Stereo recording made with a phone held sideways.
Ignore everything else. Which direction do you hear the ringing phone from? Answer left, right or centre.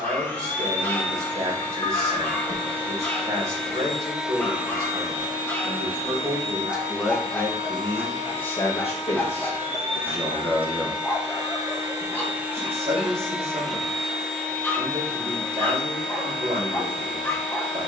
left.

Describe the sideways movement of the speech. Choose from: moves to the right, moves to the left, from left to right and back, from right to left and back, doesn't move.
from right to left and back.